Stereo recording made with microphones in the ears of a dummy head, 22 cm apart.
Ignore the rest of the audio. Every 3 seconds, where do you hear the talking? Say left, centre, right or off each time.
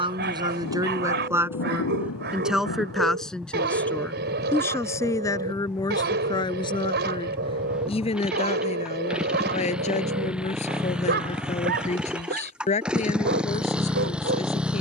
centre, centre, left, left, left.